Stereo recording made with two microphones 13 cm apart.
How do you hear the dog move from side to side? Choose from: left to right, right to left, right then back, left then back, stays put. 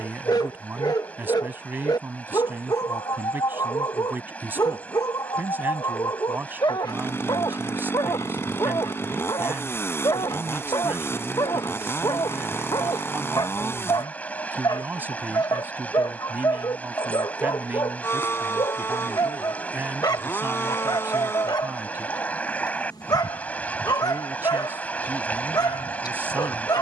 stays put.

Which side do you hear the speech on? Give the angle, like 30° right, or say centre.
20° right.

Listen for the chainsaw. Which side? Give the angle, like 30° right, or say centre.
20° left.